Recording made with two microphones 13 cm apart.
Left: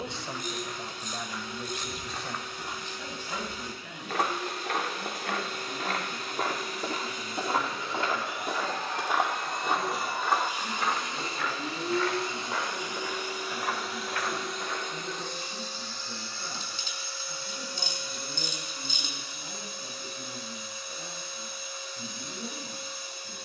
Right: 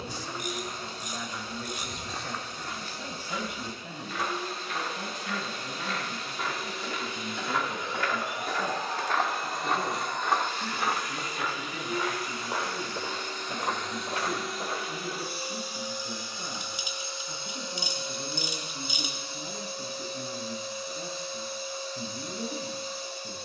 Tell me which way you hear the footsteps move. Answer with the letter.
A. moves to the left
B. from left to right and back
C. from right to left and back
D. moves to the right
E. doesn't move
C.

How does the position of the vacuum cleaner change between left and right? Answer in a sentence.
In this clip you hear the vacuum cleaner move from right to left and back again.